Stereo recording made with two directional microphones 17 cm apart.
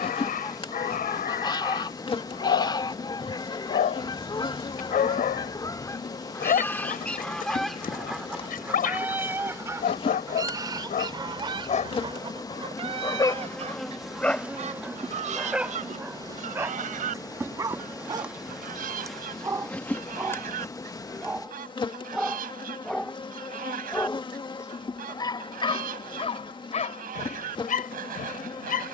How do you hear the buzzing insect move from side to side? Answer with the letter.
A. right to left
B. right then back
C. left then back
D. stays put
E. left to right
B.